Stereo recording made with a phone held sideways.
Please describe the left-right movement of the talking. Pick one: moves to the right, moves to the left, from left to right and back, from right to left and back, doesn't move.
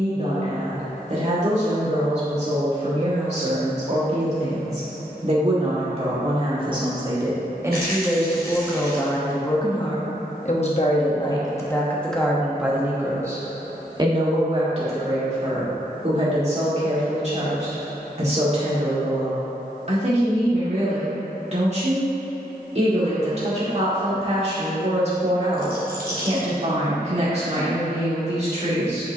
from right to left and back.